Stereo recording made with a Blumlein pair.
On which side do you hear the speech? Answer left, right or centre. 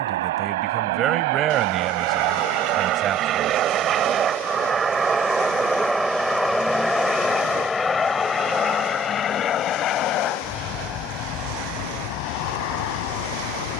right.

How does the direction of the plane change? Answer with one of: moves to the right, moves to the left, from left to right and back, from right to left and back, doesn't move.
moves to the left.